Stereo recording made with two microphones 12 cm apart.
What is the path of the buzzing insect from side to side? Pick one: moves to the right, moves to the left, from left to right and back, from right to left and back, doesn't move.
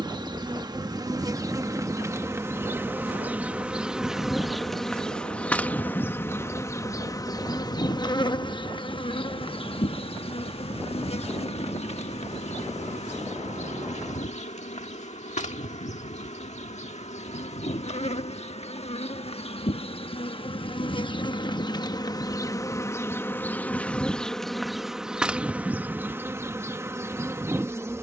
from right to left and back.